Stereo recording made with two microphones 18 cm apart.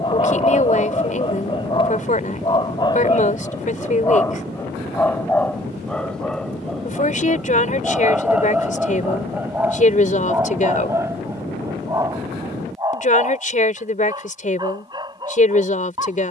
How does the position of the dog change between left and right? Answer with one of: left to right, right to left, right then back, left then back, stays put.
left to right.